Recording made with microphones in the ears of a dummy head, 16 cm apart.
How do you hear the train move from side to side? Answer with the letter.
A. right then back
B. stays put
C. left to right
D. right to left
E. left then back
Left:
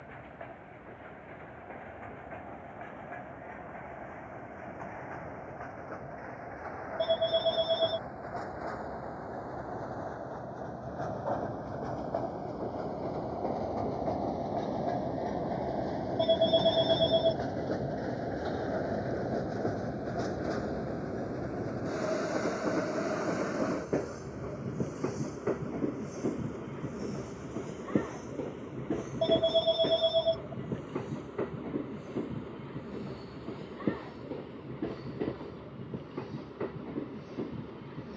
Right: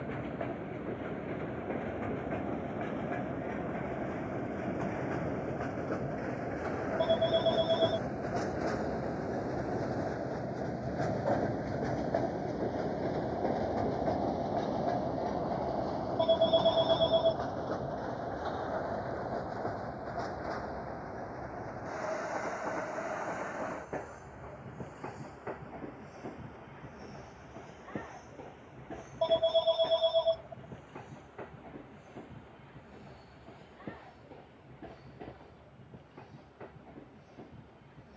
D.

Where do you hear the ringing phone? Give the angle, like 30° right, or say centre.
20° left.